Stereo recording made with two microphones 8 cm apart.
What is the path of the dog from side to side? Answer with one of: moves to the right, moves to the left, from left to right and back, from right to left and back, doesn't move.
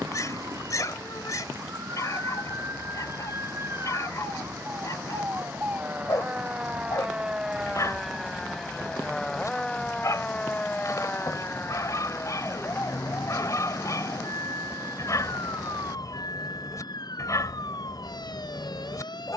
doesn't move.